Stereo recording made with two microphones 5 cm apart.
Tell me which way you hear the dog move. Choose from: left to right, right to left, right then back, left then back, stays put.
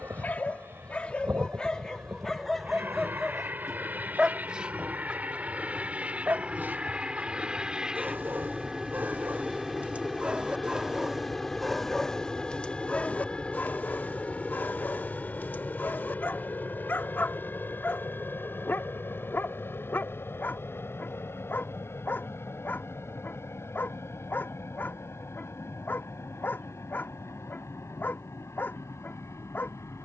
right then back.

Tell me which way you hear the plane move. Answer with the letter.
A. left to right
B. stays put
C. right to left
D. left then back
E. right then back
C.